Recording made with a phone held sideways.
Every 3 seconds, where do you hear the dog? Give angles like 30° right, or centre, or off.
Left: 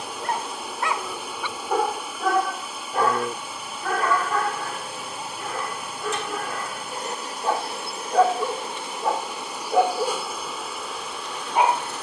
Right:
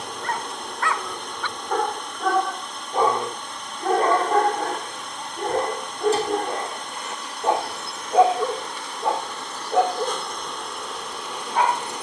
10° left, 30° right, 20° right, 10° left.